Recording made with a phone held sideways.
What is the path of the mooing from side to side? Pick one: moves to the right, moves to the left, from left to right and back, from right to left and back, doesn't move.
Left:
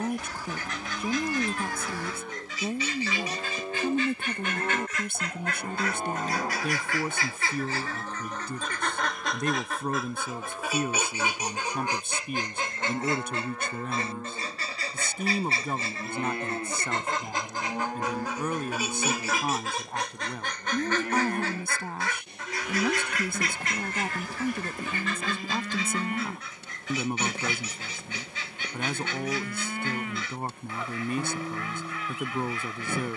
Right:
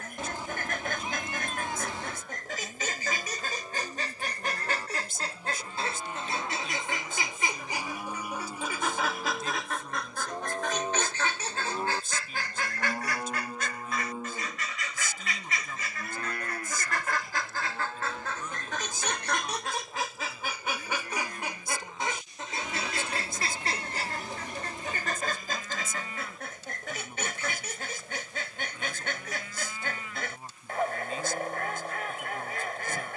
from left to right and back.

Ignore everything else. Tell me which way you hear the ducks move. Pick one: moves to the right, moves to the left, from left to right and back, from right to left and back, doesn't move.
from right to left and back.